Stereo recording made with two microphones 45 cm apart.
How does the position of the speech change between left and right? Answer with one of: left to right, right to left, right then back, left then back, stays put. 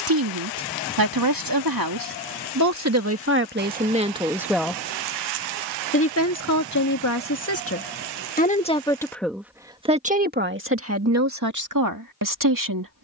left then back.